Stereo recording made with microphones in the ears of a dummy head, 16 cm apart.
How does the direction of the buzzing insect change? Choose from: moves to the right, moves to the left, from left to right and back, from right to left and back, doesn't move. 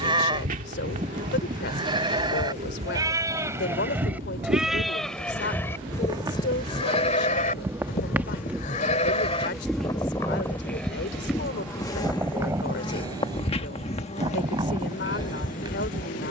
moves to the left.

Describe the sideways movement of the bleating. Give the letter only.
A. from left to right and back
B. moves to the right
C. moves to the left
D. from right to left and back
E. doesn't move
D.